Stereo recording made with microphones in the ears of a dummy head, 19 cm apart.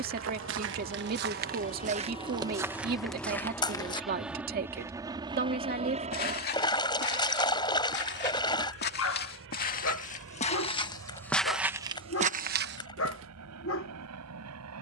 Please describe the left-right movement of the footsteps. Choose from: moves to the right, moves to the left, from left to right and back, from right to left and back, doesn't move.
from right to left and back.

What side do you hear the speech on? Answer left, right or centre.
right.